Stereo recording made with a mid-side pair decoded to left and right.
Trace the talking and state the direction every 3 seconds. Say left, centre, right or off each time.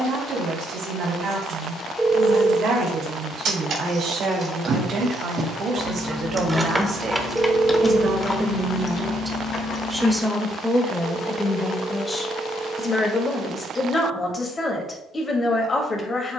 right, right, right, centre, left, left.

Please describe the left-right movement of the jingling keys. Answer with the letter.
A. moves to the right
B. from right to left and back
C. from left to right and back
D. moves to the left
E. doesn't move
D.